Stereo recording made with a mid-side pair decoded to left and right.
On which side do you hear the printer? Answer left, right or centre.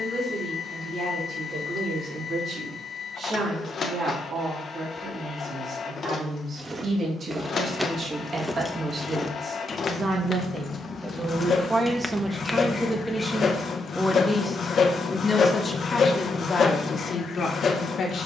left.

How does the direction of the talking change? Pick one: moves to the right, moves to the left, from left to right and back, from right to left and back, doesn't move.
moves to the left.